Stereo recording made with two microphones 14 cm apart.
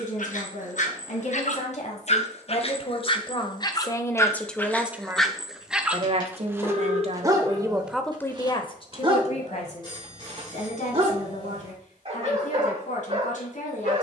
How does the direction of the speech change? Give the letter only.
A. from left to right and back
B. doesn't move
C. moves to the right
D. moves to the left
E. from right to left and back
A.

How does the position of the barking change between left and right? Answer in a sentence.
You can hear the barking go from the left side to the right.